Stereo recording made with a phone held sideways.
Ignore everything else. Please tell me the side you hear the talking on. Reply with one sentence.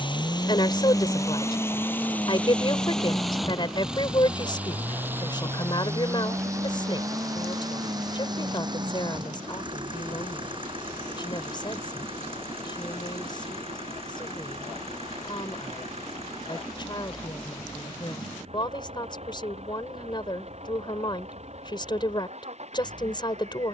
In this clip you hear the talking on the left.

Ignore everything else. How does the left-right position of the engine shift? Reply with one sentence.
You can hear the engine travel towards the right.